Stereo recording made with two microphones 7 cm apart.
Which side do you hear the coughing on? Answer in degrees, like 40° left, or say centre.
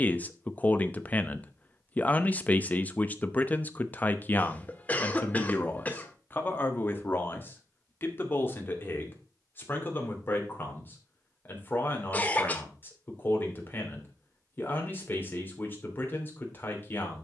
20° left.